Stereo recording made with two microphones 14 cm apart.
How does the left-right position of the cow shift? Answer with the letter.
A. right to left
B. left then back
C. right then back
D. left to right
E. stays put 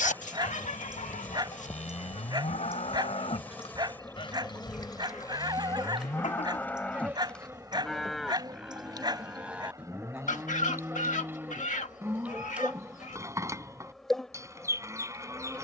D.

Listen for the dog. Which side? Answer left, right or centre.
right.